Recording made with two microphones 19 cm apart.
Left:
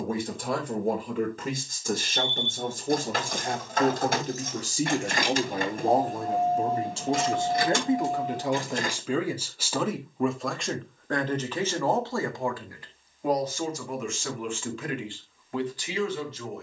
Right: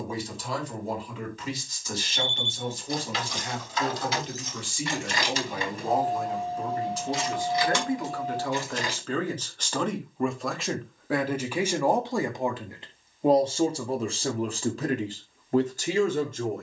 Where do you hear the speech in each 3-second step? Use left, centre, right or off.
left, left, left, centre, right, right.